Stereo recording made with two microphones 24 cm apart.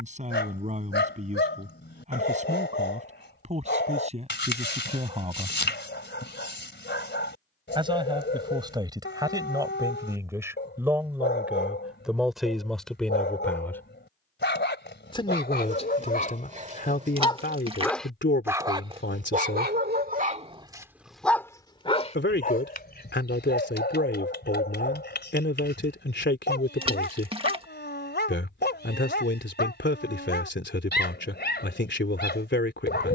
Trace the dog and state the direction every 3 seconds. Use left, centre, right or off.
left, left, left, left, left, left, right, left, left, left, left.